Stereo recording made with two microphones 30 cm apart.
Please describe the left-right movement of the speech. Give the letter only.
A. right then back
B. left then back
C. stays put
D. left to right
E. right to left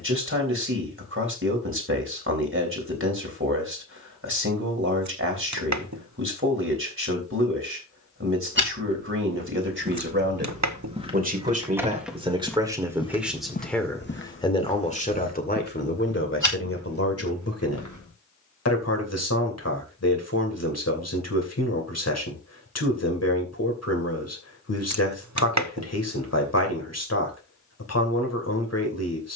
E.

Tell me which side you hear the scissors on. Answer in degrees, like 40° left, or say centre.
60° right.